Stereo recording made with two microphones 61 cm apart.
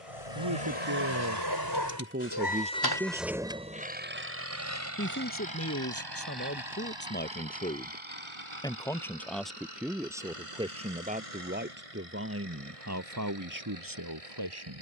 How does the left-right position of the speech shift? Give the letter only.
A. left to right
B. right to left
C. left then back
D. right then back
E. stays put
C.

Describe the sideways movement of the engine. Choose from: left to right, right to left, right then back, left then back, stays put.
left to right.